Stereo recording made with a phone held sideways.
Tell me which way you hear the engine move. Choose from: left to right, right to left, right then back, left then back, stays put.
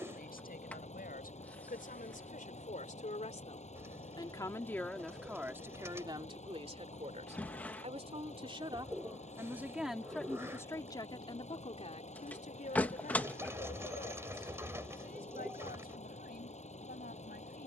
stays put.